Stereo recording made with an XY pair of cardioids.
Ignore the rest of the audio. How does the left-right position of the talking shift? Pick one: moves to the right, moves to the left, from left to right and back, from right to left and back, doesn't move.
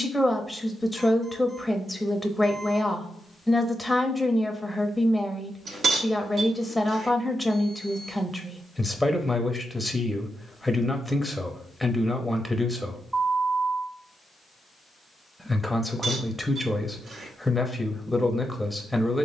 doesn't move.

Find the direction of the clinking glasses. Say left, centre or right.
right.